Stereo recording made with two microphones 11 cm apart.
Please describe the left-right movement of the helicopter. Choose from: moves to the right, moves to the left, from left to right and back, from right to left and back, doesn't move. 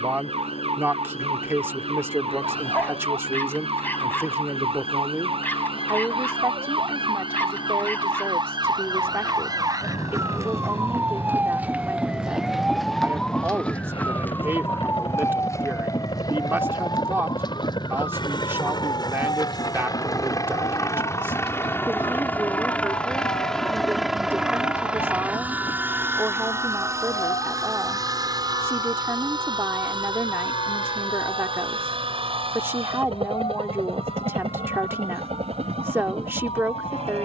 moves to the right.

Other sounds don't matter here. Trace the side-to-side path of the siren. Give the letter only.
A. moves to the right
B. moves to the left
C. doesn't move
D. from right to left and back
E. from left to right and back
B.